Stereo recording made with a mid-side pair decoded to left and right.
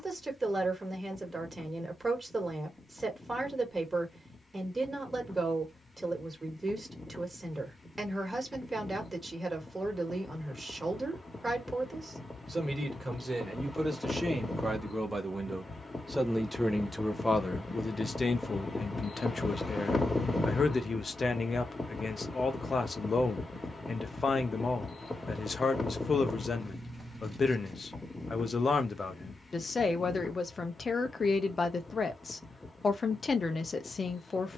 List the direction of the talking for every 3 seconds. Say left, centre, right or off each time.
right, right, right, right, right, centre, left, left, left, left, left, left.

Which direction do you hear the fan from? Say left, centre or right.
left.